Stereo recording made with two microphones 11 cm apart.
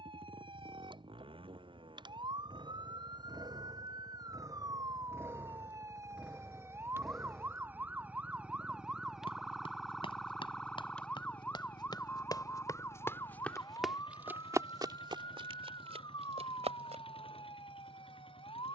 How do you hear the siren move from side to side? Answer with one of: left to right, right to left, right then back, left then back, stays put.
right to left.